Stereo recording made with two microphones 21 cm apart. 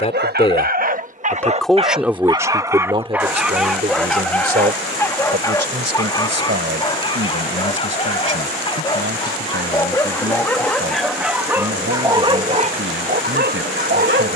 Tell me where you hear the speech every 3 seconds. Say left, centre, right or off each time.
centre, right, right, right, right.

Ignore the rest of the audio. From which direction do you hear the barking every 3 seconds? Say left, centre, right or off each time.
right, centre, left, centre, right.